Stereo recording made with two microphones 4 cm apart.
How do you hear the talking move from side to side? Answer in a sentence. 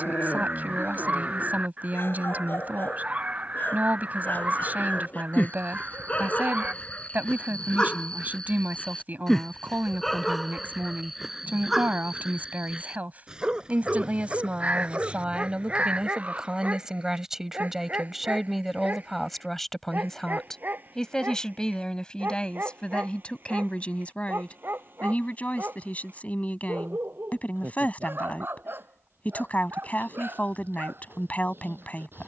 You can hear the talking go from the right side to the left.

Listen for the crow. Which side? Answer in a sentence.
In this clip you hear the crow on the right.